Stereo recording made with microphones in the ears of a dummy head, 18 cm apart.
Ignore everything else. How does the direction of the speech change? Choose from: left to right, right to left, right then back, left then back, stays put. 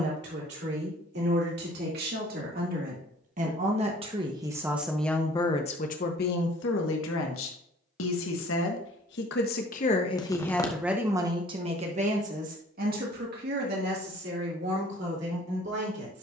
left then back.